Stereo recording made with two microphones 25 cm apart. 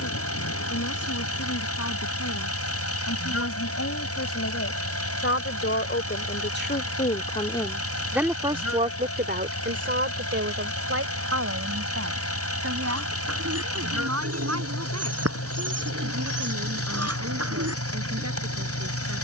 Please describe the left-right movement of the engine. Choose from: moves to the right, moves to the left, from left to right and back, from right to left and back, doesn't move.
doesn't move.